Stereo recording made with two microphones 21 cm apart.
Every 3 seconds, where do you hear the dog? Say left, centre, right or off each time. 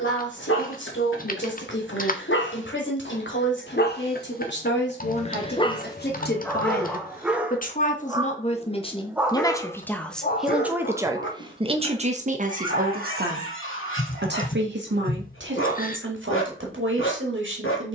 left, left, centre, left, left, left.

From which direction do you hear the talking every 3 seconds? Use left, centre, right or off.
left, left, left, centre, right, right.